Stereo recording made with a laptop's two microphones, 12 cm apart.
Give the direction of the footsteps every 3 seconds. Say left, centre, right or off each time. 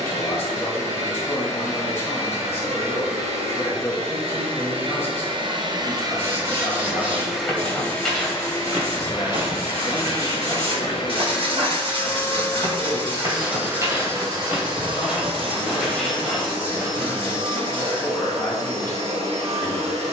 off, off, centre, right, right, centre, off.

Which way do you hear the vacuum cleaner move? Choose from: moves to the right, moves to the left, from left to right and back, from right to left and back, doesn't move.
from right to left and back.